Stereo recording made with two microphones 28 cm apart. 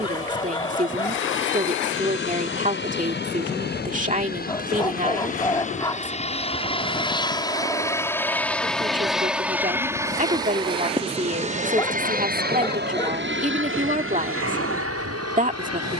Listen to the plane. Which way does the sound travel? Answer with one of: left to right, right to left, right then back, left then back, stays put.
left to right.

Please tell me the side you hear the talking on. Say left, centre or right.
right.